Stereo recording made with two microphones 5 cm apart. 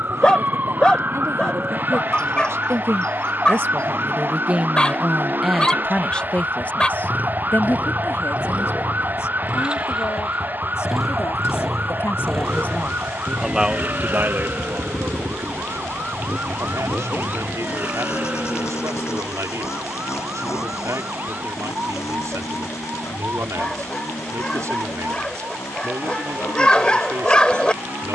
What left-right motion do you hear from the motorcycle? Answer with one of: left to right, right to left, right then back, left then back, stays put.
right to left.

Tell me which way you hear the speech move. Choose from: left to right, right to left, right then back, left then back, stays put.
left then back.